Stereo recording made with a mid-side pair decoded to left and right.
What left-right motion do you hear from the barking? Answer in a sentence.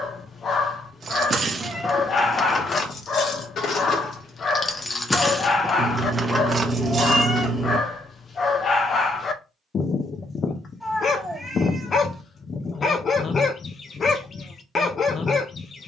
You can hear the barking stay in one place.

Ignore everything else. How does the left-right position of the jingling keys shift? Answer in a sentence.
In this clip you hear the jingling keys move from right to left and back again.